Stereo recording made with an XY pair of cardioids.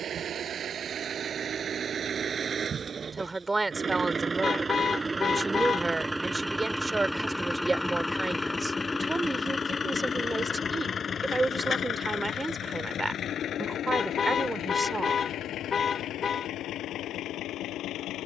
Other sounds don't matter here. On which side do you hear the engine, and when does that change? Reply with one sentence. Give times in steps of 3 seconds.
In this clip you hear the engine on the right from 0 s, in the centre from 6 s and on the left from 9 s.